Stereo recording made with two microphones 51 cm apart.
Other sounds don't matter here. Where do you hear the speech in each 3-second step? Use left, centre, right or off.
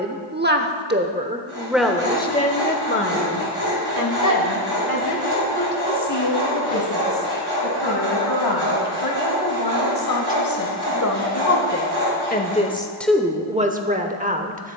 centre, left, left, left, centre.